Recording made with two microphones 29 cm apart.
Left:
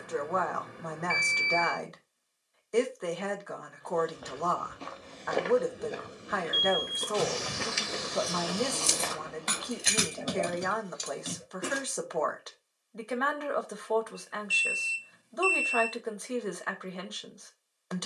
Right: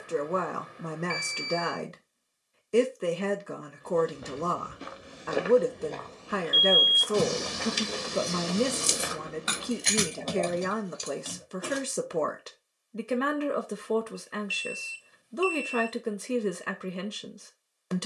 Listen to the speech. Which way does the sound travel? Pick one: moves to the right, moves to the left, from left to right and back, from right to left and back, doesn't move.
doesn't move.